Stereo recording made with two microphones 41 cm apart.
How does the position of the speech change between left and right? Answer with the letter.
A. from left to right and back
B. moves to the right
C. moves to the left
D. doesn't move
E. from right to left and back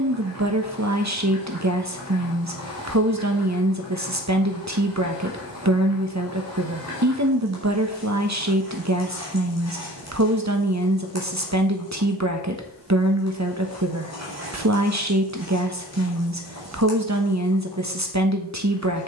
D.